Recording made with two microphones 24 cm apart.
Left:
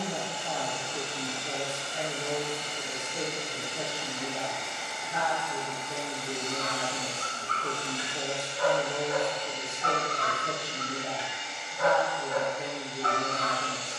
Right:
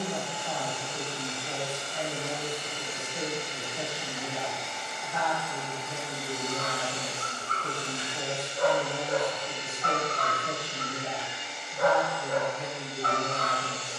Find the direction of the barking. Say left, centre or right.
right.